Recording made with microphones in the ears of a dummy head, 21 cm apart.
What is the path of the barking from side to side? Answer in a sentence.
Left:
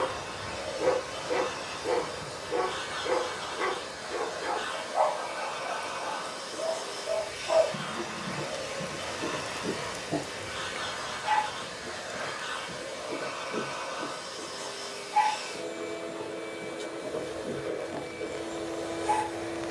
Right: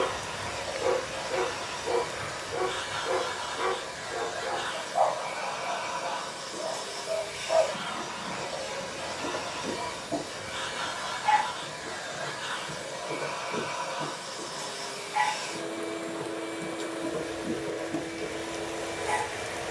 You can hear the barking travel towards the right.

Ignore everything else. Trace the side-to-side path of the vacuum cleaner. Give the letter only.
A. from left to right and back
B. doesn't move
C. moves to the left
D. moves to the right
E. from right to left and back
B.